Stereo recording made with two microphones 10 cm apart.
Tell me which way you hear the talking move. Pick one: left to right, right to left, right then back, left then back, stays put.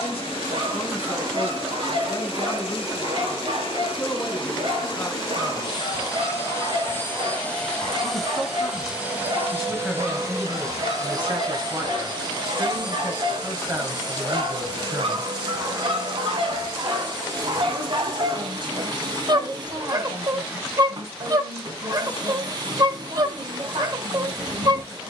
left to right.